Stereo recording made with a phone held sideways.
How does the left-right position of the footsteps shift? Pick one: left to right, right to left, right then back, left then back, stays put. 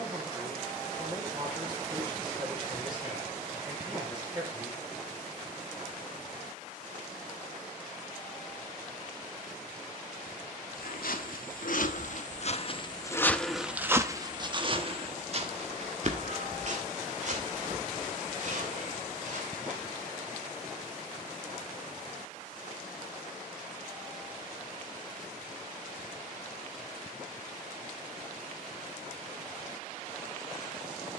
left to right.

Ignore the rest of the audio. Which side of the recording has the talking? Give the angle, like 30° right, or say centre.
30° right.